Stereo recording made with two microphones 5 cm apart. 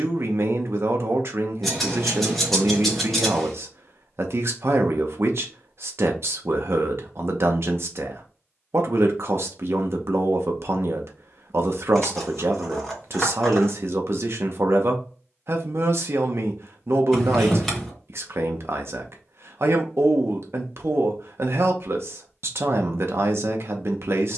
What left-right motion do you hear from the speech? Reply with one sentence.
You can hear the speech stay put.